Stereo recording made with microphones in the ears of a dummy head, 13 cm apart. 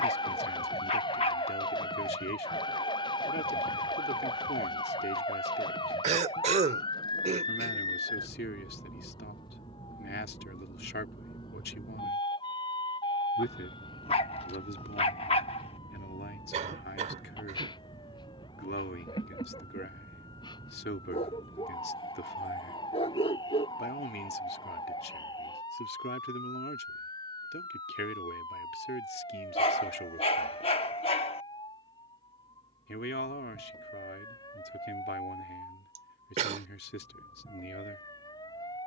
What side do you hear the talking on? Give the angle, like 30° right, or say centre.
80° left.